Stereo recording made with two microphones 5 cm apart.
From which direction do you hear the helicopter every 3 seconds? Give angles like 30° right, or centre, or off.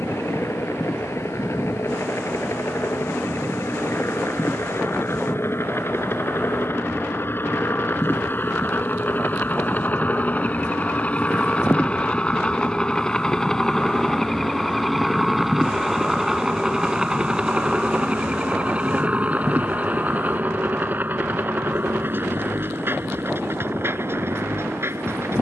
60° left, 50° left, 40° left, 30° left, 10° left, 10° right, 30° right, 40° right, 50° right.